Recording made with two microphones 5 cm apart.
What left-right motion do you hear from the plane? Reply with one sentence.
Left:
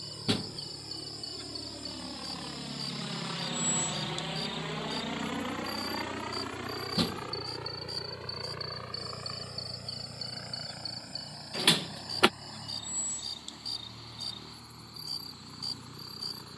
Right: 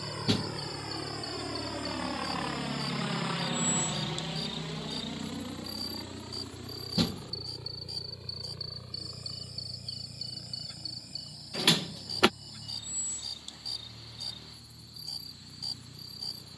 You can hear the plane travel towards the left.